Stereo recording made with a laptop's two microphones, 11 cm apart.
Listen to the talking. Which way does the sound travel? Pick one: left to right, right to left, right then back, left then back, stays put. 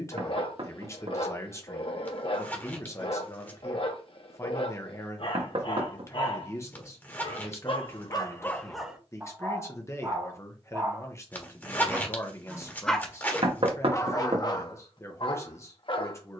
stays put.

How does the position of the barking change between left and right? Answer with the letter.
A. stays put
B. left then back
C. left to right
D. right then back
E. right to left
D.